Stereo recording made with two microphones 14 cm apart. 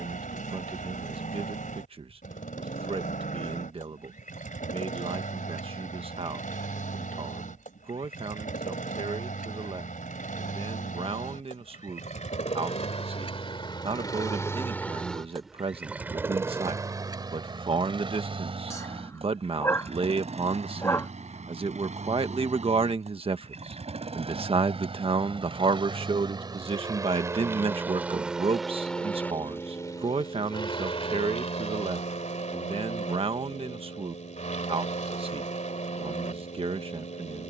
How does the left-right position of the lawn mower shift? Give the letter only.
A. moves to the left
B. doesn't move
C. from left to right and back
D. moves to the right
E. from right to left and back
C.